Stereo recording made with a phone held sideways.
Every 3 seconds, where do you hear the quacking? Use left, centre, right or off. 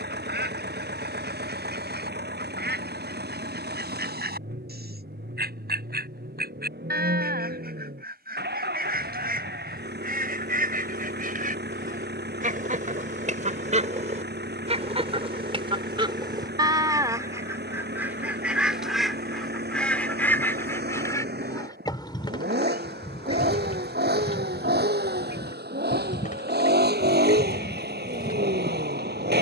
right, right, right, right, right, right, centre, left, left, left.